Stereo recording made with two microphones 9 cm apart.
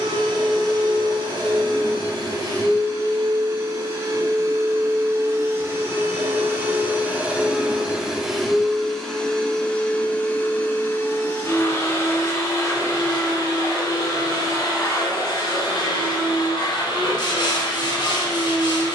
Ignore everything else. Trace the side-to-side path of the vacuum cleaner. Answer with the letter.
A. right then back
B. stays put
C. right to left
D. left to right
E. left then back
C.